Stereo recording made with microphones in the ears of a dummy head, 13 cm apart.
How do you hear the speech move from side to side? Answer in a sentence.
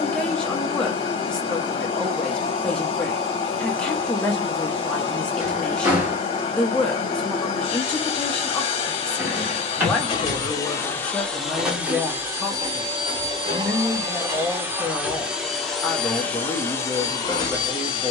You can hear the speech stay put.